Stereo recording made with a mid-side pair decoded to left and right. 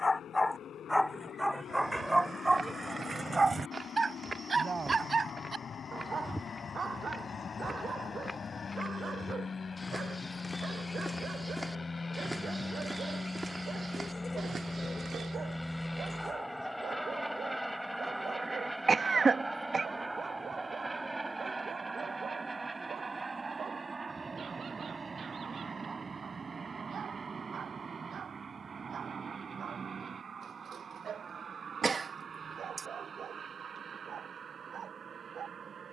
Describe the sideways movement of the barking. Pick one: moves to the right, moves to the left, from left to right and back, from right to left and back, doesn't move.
moves to the right.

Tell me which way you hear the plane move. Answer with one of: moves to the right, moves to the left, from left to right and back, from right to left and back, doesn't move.
moves to the right.